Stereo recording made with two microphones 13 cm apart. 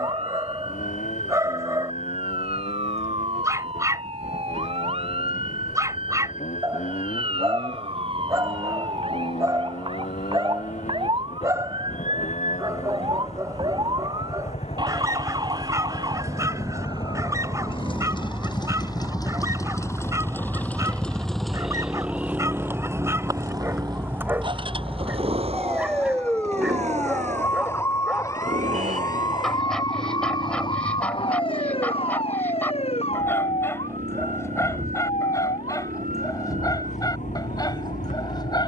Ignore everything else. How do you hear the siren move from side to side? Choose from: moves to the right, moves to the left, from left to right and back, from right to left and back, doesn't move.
moves to the left.